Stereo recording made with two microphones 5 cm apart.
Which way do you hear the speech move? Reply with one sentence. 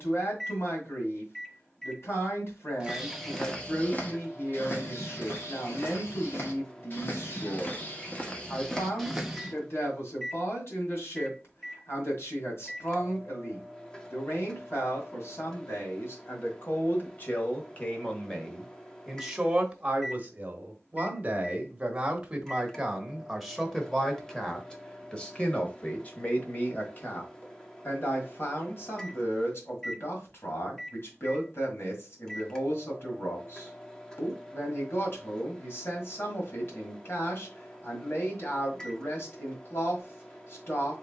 In this clip you hear the speech move from left to right and back again.